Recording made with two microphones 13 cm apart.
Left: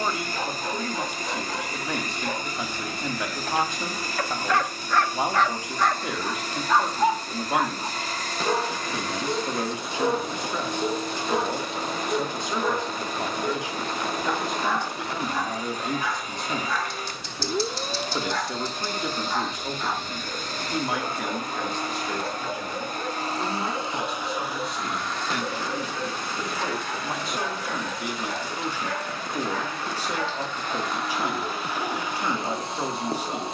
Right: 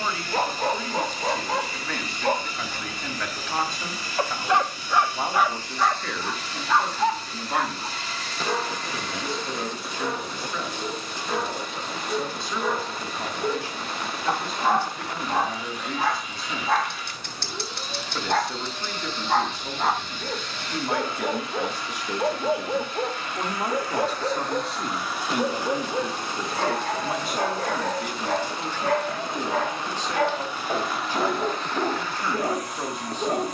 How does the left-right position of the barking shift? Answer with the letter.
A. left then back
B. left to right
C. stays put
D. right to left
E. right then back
A.